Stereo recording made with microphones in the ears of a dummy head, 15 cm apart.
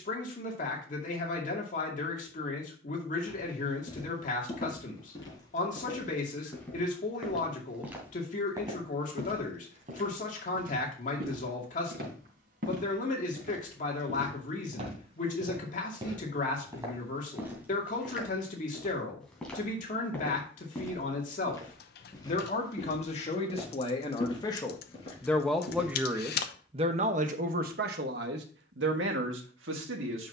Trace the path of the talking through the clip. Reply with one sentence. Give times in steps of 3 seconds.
In this clip you hear the talking on the left from 0 s, in the centre from 24 s and on the right from 27 s.